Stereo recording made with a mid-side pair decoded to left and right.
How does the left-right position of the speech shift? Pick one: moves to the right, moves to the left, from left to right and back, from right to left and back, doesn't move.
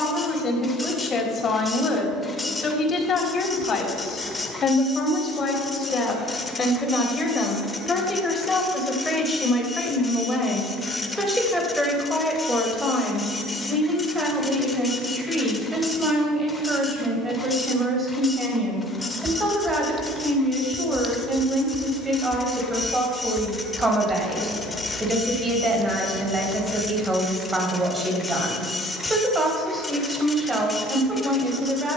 moves to the right.